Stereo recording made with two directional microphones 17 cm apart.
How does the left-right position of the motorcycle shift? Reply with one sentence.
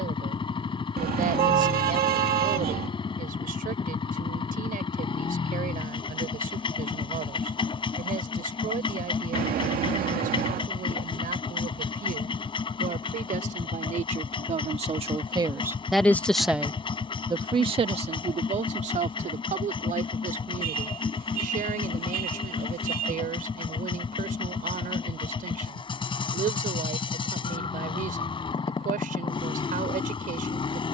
In this clip you hear the motorcycle stay in one place.